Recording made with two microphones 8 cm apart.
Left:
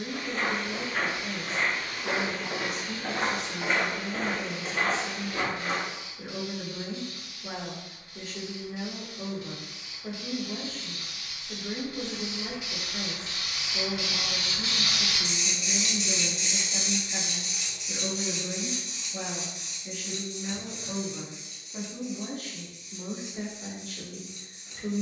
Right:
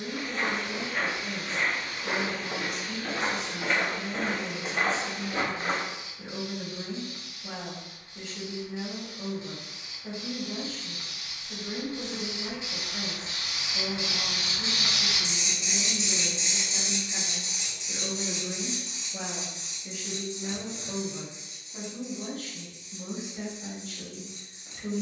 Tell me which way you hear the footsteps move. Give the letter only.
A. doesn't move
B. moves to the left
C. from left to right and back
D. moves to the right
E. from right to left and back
D.